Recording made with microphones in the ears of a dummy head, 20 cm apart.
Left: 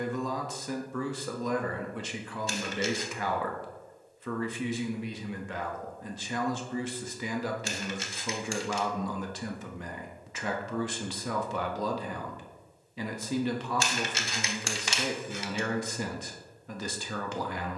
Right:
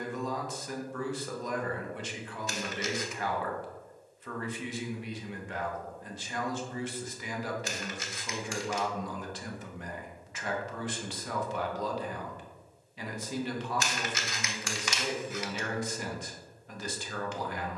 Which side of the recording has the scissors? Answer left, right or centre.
left.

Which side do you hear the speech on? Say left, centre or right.
left.